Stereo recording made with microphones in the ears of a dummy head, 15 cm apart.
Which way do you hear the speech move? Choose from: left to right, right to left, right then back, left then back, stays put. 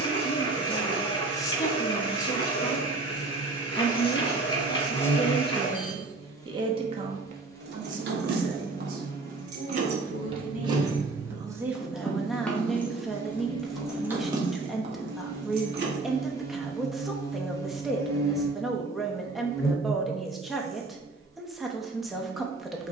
right then back.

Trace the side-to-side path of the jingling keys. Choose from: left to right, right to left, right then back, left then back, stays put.
left then back.